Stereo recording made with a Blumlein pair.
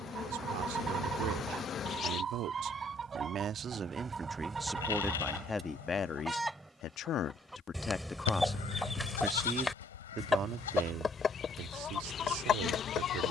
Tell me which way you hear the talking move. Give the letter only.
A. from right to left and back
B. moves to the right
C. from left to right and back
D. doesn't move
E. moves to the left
A.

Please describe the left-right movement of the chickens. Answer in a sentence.
You can hear the chickens move from right to left.